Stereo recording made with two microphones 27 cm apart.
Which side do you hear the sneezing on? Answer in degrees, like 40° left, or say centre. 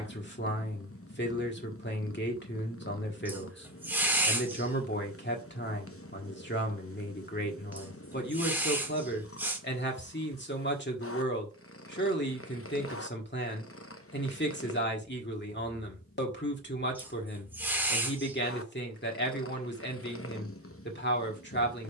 10° right.